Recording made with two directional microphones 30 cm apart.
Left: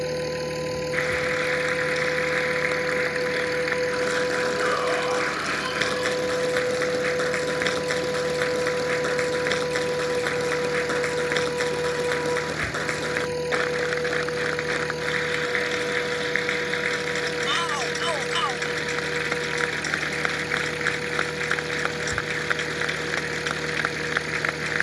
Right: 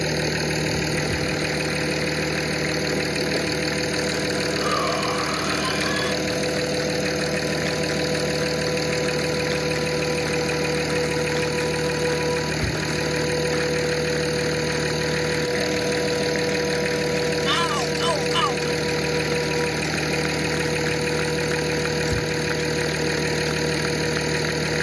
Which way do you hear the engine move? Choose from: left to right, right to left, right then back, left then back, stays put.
stays put.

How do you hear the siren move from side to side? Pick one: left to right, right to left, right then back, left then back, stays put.
left to right.